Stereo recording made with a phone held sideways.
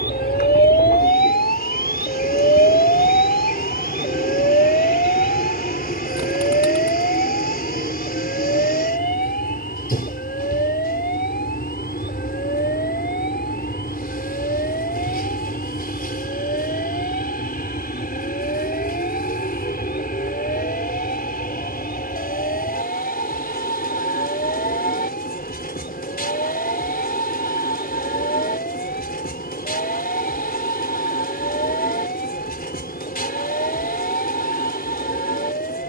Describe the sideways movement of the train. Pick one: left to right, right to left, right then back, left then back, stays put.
stays put.